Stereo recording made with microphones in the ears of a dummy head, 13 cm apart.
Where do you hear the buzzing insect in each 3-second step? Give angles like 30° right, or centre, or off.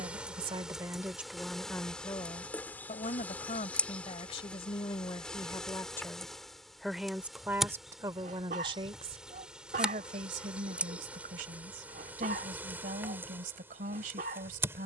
centre, 10° left, centre, 10° right, 20° right.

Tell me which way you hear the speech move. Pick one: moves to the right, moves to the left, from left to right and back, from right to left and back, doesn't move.
from right to left and back.